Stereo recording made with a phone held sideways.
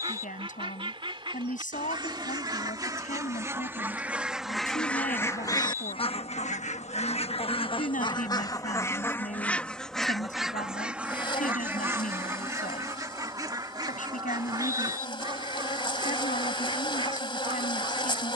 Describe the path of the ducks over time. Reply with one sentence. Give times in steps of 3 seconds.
You can hear the ducks on the right from 0 s, in the centre from 3 s, on the left from 6 s, in the centre from 9 s and on the right from 12 s.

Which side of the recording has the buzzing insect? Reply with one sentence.
In this clip you hear the buzzing insect on the left.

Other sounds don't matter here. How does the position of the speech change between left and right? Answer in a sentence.
In this clip you hear the speech stay put.